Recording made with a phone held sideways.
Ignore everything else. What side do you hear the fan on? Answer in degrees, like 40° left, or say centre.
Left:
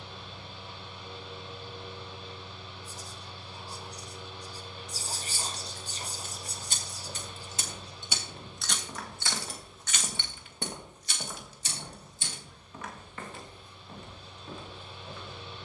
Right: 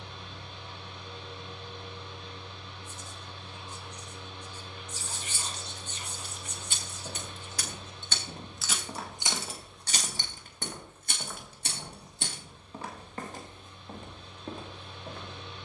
10° left.